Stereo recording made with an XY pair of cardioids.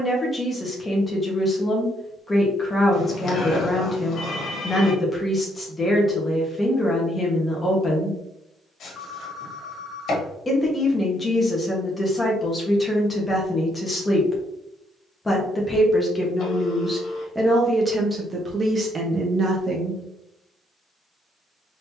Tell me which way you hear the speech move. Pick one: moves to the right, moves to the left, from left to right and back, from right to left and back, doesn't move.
moves to the right.